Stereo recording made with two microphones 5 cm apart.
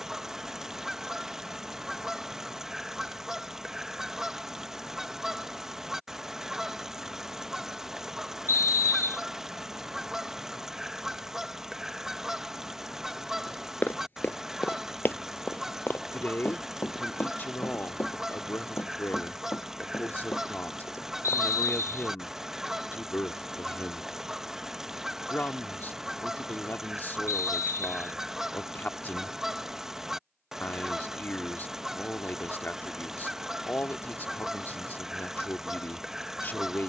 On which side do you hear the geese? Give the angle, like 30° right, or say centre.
10° right.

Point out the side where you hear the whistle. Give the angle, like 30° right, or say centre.
60° left.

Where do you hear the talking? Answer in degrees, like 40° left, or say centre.
40° left.